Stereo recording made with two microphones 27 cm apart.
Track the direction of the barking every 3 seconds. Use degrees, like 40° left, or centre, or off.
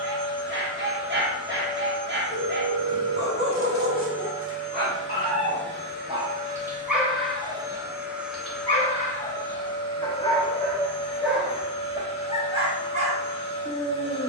40° right, 40° right, centre, 10° left, 30° right.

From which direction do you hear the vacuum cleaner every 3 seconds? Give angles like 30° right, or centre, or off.
20° right, 50° right, 20° right, 20° left, 20° left.